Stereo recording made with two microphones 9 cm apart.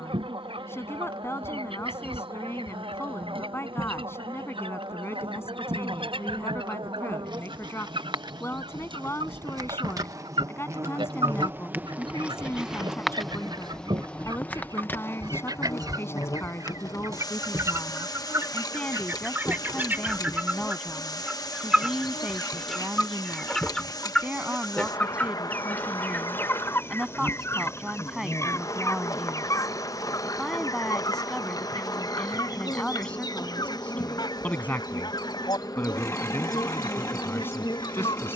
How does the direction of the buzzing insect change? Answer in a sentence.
In this clip you hear the buzzing insect travel towards the left.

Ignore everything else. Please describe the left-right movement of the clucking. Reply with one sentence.
In this clip you hear the clucking go from the right side to the left.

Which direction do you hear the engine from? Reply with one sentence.
In this clip you hear the engine on the left.